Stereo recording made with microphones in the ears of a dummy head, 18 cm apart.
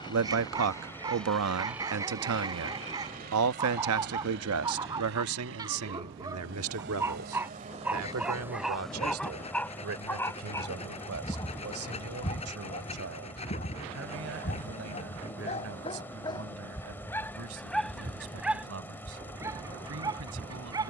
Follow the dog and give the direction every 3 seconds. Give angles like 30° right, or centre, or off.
20° right, 20° right, 10° right, 10° left, 40° left, 20° left, 10° right.